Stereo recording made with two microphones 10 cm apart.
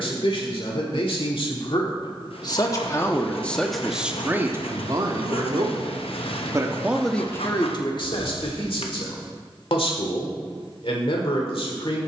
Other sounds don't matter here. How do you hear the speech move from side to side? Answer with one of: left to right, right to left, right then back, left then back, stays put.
right then back.